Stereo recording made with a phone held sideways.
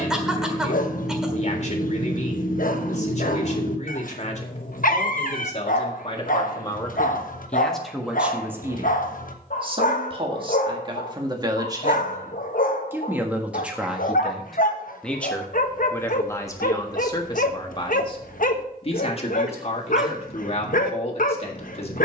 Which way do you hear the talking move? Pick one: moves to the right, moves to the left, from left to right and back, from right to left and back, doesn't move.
from left to right and back.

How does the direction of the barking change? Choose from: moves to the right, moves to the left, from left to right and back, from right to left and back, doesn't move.
doesn't move.